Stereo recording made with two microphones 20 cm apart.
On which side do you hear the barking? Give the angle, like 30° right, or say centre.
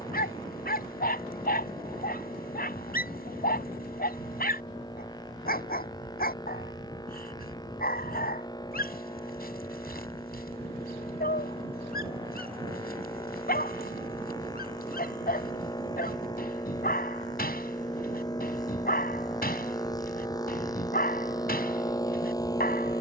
50° left.